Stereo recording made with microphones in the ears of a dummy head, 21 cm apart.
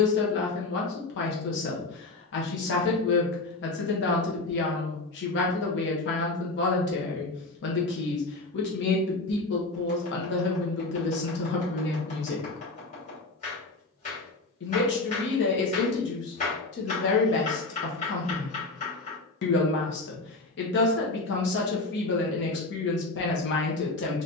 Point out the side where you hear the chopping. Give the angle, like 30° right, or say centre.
30° left.